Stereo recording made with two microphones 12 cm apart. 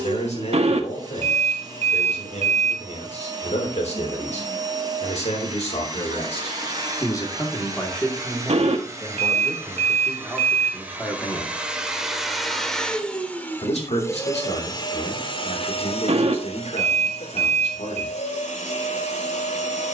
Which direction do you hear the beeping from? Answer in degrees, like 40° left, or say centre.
60° right.